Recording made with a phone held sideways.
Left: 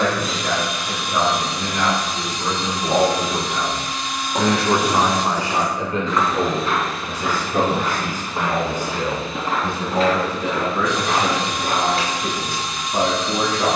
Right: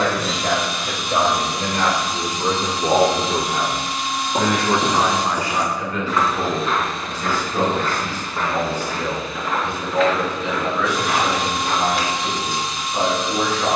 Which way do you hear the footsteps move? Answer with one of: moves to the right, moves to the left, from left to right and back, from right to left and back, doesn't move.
moves to the left.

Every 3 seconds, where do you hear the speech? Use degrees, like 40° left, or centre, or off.
70° right, centre, 50° left, 60° left, 60° left.